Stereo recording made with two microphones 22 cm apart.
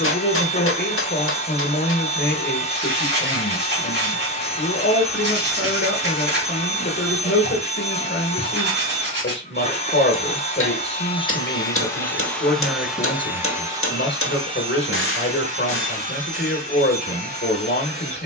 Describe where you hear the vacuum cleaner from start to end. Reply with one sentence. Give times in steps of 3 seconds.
You can hear the vacuum cleaner on the left from 0 s, in the centre from 12 s and on the right from 15 s.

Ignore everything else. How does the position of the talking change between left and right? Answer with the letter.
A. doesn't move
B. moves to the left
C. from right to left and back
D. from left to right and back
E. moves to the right
A.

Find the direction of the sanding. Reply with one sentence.
In this clip you hear the sanding on the right.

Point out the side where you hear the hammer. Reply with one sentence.
You can hear the hammer on the left.